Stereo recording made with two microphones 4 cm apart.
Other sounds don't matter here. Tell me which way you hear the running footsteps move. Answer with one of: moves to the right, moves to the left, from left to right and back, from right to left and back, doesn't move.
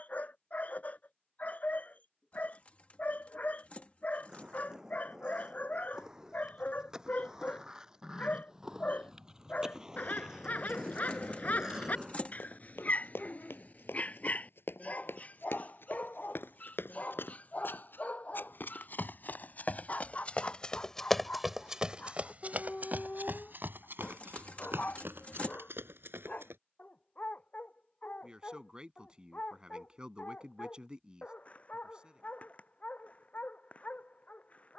moves to the right.